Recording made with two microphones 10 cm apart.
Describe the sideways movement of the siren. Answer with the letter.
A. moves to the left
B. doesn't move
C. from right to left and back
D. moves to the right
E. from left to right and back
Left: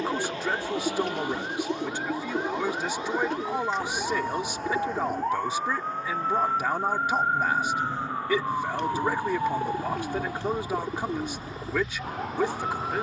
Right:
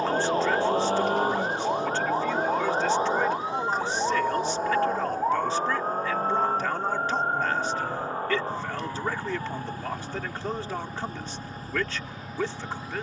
A.